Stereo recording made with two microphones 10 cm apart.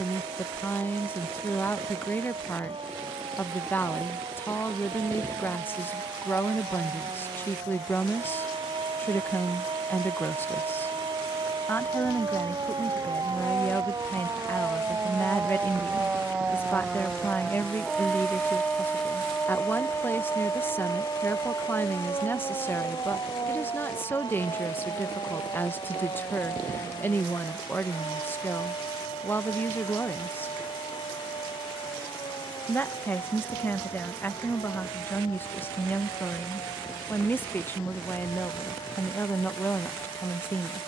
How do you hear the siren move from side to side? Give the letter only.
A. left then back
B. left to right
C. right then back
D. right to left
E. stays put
D.